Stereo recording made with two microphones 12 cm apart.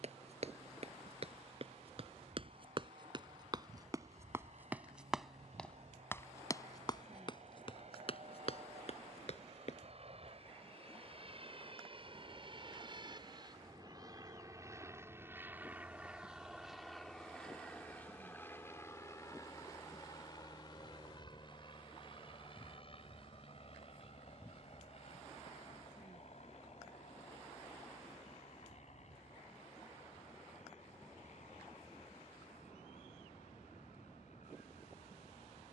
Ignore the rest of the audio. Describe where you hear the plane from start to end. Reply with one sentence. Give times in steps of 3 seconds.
In this clip you hear the plane on the right from 0 s, in the centre from 15 s and on the left from 18 s.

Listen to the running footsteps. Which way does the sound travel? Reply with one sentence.
You can hear the running footsteps go from the right side to the left.